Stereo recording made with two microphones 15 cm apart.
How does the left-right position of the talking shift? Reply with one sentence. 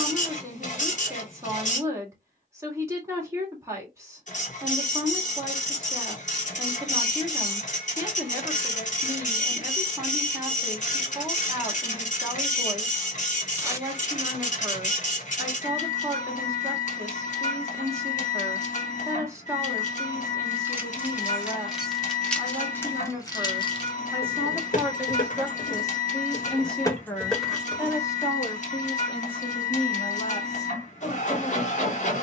You can hear the talking move to the left.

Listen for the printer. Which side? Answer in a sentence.
You can hear the printer on the left.